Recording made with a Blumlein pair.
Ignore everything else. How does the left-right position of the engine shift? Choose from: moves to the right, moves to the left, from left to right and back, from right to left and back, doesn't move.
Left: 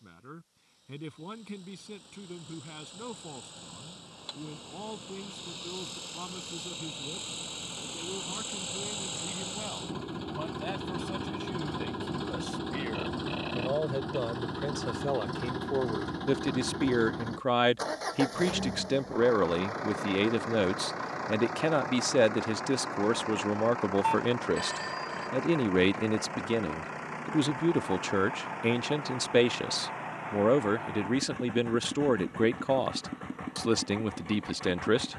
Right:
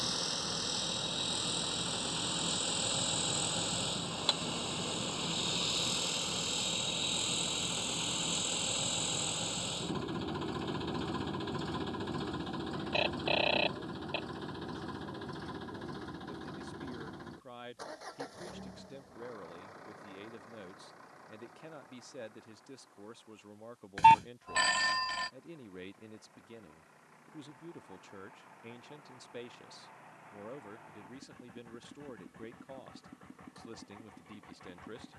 moves to the left.